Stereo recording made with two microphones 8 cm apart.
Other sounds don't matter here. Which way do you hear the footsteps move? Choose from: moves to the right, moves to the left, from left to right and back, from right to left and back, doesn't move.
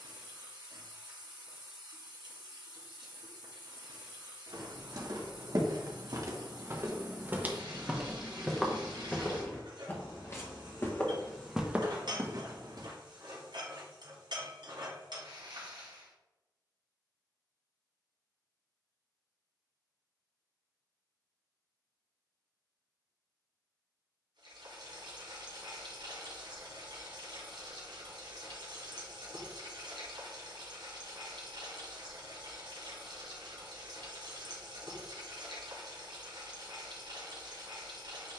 from right to left and back.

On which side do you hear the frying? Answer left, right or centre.
right.